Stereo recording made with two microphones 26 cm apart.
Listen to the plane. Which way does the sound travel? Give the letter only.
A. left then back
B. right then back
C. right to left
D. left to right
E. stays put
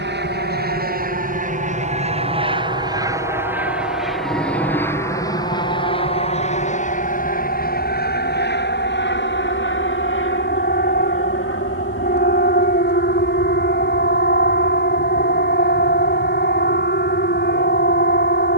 C.